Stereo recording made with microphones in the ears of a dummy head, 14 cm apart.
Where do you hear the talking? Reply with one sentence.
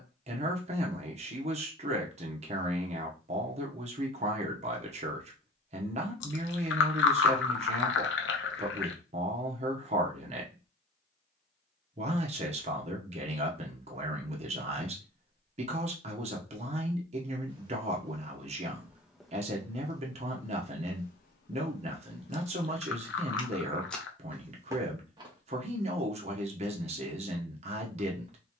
You can hear the talking on the right.